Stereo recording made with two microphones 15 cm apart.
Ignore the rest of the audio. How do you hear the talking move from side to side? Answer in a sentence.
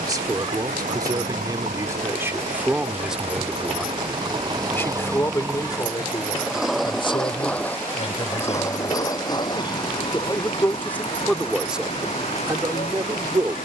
In this clip you hear the talking move from right to left and back again.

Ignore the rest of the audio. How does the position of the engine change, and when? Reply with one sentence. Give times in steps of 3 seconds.
In this clip you hear the engine on the right from 0 s, in the centre from 6 s and on the left from 9 s.